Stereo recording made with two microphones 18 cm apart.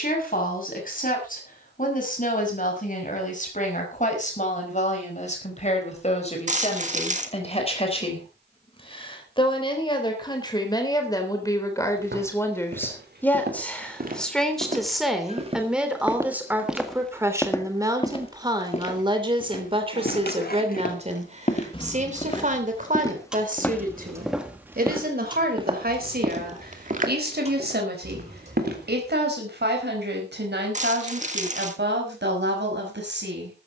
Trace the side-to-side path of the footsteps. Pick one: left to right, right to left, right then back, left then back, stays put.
left then back.